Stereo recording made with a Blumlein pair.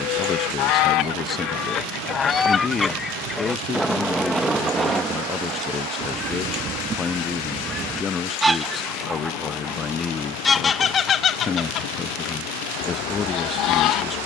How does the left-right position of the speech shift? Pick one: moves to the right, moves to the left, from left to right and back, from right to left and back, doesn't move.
doesn't move.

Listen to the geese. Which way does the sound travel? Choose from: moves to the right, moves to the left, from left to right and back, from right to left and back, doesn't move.
from left to right and back.